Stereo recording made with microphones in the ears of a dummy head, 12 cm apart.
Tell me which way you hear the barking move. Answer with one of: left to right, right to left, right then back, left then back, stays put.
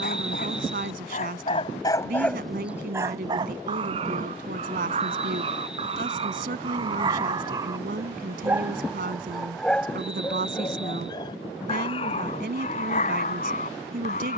right then back.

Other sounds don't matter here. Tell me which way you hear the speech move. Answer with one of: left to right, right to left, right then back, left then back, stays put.
stays put.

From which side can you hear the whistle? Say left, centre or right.
centre.